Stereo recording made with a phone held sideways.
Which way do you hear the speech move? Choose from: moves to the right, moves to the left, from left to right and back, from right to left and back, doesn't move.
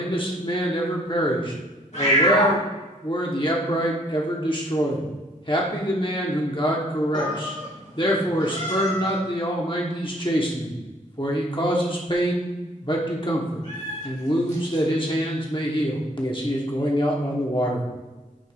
doesn't move.